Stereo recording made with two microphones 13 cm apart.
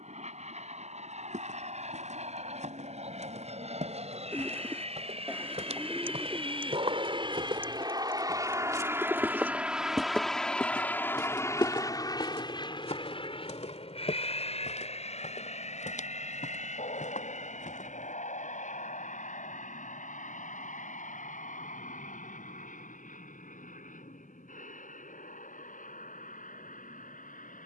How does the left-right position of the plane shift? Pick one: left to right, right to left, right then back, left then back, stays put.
right to left.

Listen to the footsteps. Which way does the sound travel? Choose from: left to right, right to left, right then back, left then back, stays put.
right to left.